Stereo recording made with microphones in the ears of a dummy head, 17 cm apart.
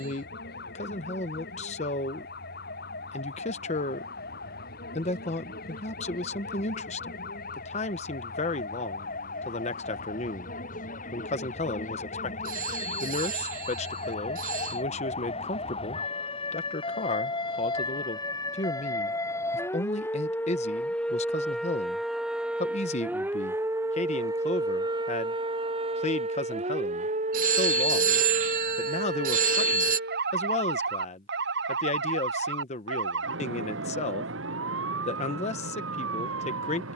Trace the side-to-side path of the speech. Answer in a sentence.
In this clip you hear the speech stay put.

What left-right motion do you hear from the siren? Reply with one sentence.
You can hear the siren travel towards the right.